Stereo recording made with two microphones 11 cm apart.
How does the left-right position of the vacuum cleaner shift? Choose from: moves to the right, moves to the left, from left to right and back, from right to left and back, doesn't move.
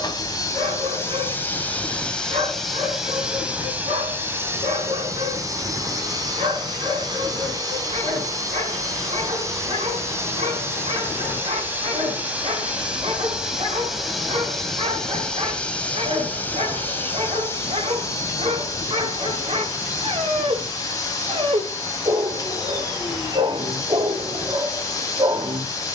from left to right and back.